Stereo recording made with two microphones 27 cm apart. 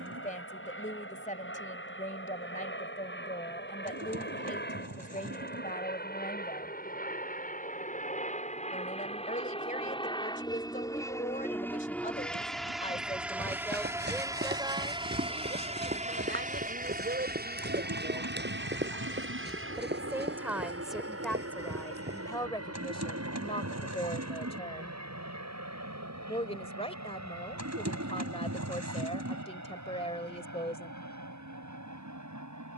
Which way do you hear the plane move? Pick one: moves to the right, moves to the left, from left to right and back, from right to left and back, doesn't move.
moves to the right.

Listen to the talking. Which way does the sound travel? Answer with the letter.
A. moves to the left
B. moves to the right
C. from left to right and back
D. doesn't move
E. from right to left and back
C.